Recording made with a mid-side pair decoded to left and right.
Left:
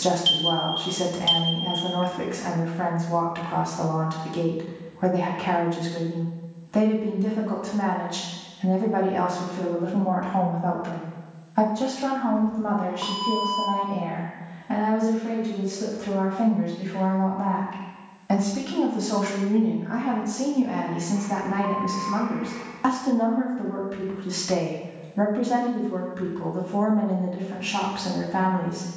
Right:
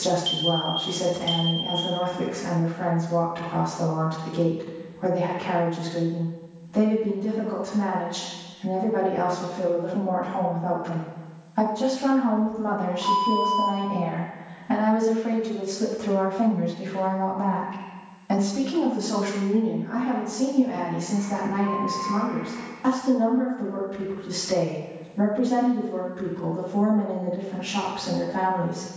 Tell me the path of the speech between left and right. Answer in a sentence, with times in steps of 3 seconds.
You can hear the speech on the left from 0 s, in the centre from 12 s and on the left from 18 s.